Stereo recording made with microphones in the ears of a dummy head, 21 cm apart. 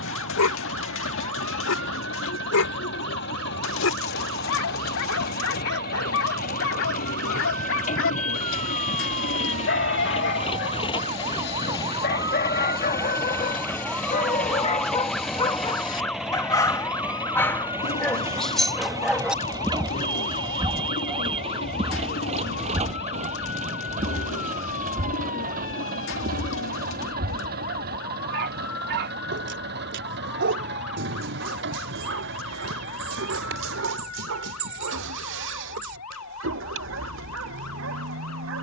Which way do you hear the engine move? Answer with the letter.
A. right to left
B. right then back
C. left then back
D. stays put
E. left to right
E.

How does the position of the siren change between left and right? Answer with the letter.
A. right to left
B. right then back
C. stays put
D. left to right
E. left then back
A.